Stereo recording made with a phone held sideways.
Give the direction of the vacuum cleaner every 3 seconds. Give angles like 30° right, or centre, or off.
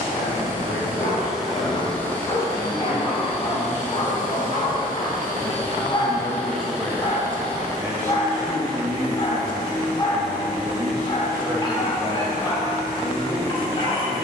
centre, 50° left, 10° right, 20° right, 20° right.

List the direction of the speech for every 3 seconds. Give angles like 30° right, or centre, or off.
60° left, 40° left, 10° right, 30° right, 50° left.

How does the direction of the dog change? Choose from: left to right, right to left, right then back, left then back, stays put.
stays put.